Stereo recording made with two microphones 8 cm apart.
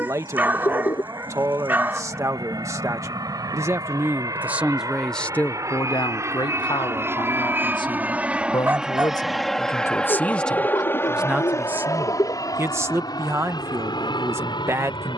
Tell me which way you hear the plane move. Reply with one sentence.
In this clip you hear the plane travel towards the left.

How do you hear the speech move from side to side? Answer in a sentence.
In this clip you hear the speech move from right to left and back again.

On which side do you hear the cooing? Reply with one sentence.
You can hear the cooing on the left.